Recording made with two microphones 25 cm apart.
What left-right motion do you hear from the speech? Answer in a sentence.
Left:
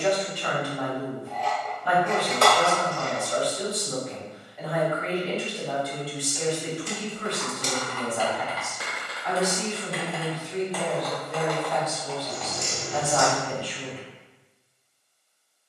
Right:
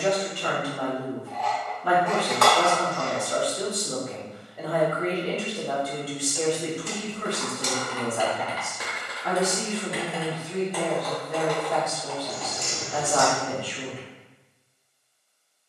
You can hear the speech stay put.